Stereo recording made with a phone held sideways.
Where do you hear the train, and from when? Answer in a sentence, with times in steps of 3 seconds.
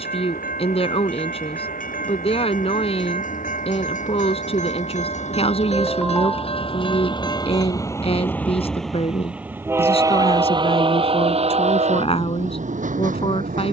In this clip you hear the train on the left from 0 s and on the right from 9 s.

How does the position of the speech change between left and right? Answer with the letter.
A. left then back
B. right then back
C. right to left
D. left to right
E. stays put
E.